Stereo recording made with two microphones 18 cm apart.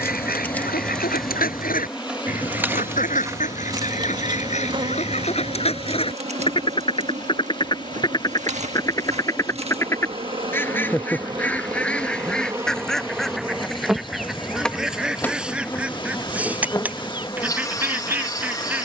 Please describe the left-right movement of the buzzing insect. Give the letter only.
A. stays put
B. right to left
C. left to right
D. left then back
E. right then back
E.